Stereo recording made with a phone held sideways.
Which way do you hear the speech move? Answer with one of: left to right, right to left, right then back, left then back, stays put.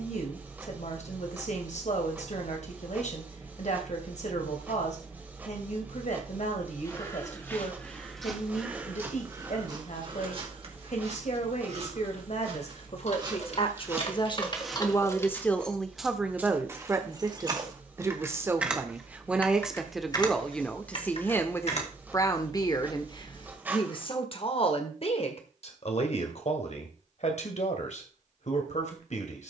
right then back.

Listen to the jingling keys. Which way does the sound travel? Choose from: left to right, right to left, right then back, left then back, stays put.
right then back.